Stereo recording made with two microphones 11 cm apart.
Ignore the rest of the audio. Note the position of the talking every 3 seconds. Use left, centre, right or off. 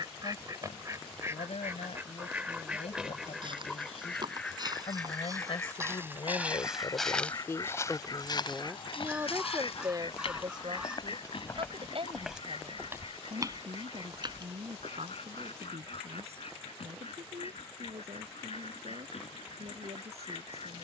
left, left, left, right, right, right, right.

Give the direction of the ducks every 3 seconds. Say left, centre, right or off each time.
right, centre, left, left, left, left, left.